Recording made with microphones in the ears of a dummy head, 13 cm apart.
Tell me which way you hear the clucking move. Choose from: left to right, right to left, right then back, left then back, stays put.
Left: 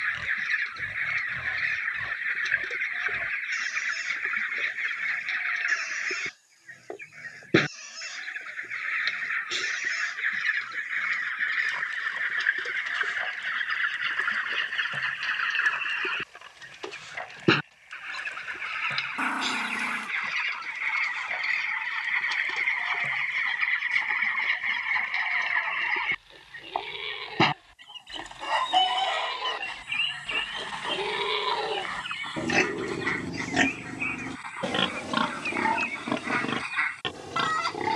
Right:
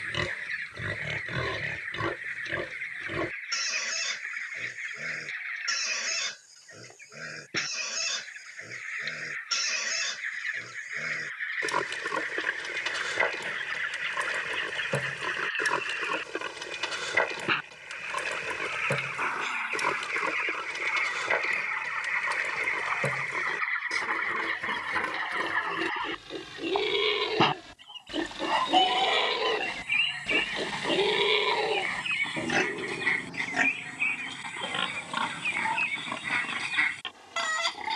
left to right.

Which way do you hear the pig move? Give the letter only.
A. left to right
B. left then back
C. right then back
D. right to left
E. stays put
D.